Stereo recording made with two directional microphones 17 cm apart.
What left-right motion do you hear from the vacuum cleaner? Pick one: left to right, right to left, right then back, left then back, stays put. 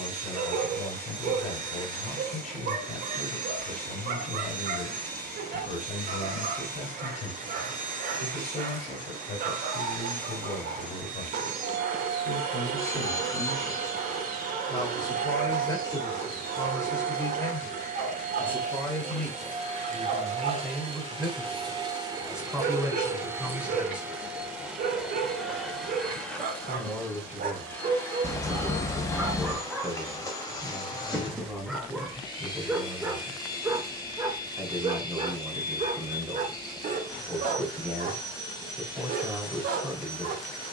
right to left.